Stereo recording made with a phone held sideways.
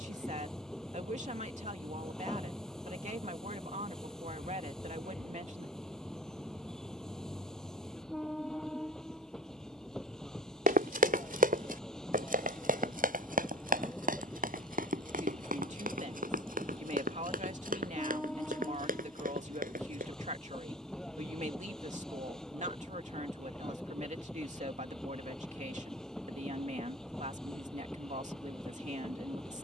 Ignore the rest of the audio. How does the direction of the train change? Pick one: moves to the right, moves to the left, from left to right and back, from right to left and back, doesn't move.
doesn't move.